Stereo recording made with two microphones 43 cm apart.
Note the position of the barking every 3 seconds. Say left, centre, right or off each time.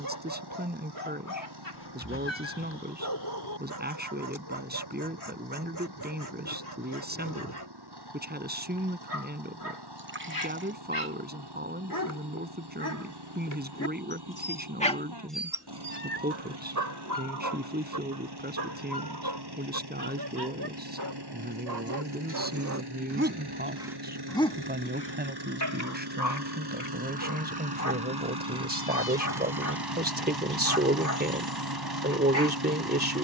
left, left, left, left, left, right, right, right, left, left, left.